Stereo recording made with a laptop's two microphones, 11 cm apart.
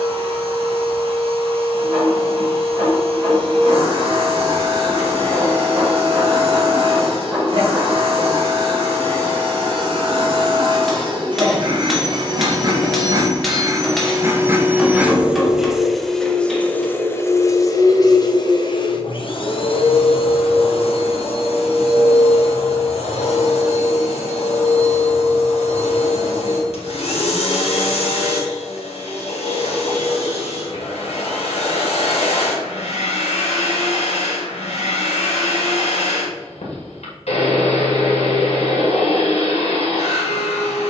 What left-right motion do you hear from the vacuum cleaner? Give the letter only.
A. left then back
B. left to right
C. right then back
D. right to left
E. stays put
D.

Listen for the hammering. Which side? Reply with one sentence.
You can hear the hammering in the centre.